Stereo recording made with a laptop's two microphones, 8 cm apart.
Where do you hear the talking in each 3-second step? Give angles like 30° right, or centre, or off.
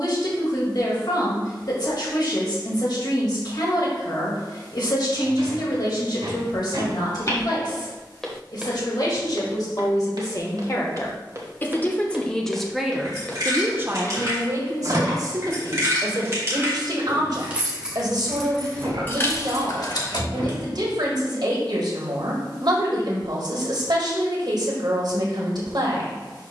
60° left, 60° left, 60° left, 40° left, 20° right, 60° right, 60° right, 60° right, 60° right.